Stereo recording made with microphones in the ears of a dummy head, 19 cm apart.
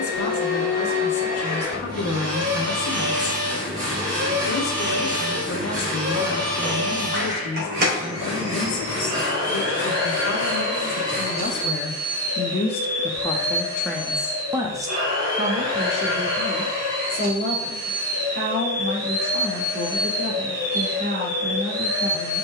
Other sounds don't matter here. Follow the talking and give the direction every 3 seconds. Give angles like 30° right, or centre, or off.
70° left, 70° left, 70° left, 60° left, 10° left, 40° right, 50° right, 50° right.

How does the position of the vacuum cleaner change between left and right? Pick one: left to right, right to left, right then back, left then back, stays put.
stays put.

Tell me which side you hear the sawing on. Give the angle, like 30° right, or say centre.
40° right.